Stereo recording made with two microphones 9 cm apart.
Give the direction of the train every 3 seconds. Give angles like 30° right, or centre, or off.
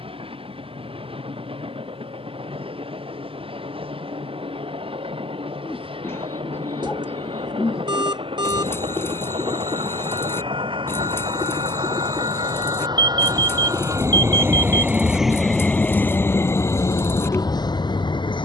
80° right, 80° right, 80° right, 70° right, 40° right, 30° left.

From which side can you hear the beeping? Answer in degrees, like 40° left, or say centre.
50° right.